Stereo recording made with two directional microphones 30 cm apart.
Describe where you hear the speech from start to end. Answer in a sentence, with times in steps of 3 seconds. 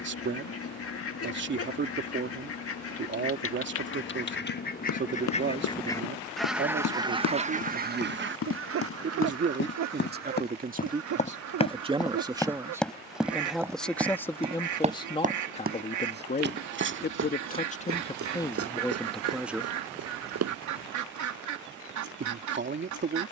You can hear the speech on the right from 0 s, in the centre from 12 s, on the left from 15 s, in the centre from 18 s and on the right from 21 s.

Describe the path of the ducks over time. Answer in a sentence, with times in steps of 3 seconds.
In this clip you hear the ducks on the left from 0 s and on the right from 6 s.